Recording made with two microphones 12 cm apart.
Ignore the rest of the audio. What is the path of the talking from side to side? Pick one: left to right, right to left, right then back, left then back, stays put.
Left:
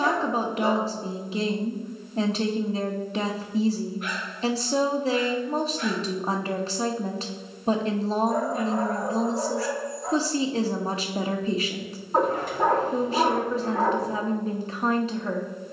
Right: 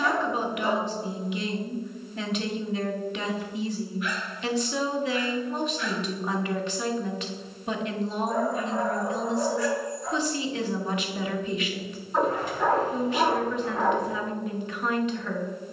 stays put.